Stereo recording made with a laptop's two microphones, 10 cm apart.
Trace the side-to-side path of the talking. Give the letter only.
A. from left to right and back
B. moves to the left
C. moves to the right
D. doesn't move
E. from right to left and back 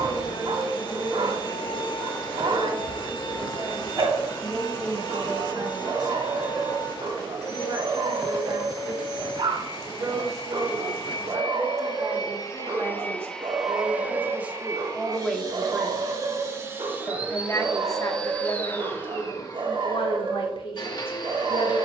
B.